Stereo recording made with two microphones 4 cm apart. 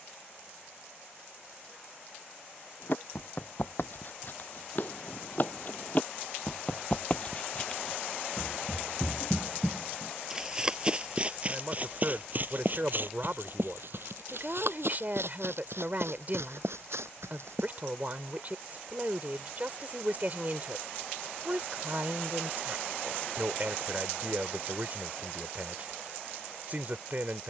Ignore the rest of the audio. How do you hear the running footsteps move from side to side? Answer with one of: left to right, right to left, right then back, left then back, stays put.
left to right.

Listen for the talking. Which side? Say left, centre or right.
right.